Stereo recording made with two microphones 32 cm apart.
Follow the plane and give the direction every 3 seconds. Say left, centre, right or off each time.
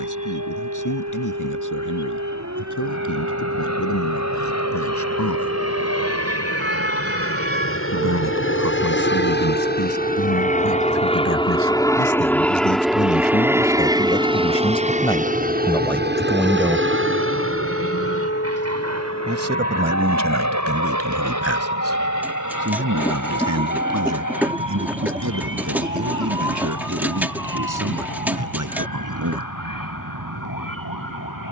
left, left, left, left, centre, right, right, right, right, right, right.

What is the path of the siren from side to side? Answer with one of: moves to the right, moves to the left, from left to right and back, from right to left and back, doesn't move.
moves to the left.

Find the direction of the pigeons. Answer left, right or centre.
centre.